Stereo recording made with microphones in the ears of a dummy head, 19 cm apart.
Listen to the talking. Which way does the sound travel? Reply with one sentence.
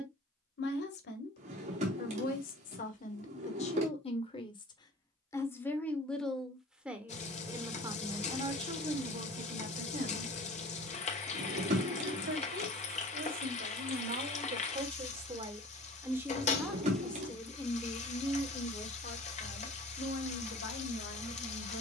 In this clip you hear the talking go right and come back.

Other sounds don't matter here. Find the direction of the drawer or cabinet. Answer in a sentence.
In this clip you hear the drawer or cabinet on the right.